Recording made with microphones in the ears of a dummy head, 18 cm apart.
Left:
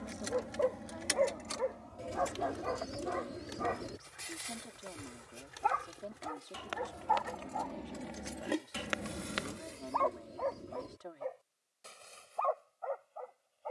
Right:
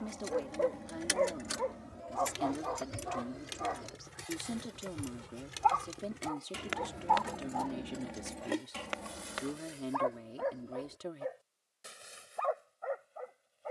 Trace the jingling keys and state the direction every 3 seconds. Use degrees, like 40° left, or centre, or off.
10° right, 40° right, 10° right, 30° left, off.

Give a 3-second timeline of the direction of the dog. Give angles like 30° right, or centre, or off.
10° left, 30° left, 10° left, 10° right, 20° right.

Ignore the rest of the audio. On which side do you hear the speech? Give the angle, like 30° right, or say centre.
40° right.